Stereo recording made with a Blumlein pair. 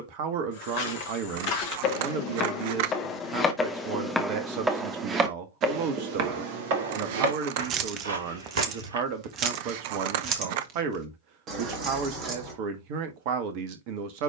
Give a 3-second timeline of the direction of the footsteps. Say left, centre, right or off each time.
left, centre, right, off, off.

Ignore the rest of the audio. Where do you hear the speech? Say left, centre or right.
right.